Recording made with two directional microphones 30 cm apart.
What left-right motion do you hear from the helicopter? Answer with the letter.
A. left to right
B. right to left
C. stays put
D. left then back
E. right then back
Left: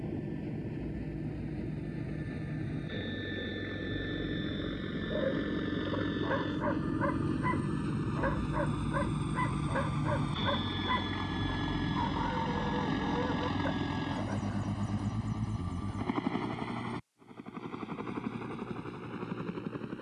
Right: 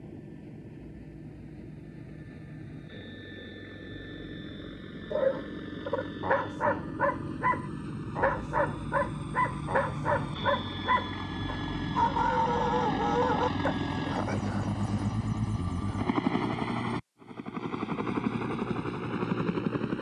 A.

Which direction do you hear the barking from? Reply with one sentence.
In this clip you hear the barking on the right.